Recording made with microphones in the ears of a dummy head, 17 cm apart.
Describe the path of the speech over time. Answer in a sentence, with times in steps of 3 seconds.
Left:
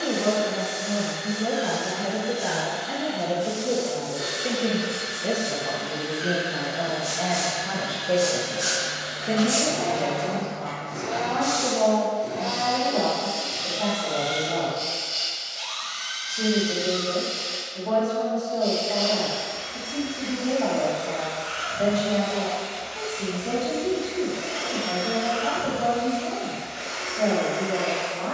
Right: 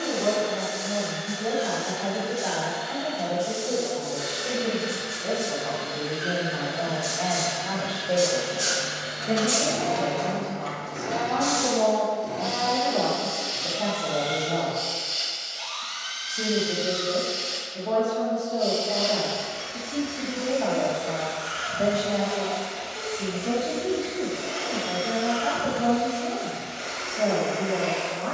You can hear the speech on the left from 0 s and in the centre from 9 s.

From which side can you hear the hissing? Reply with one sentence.
You can hear the hissing on the right.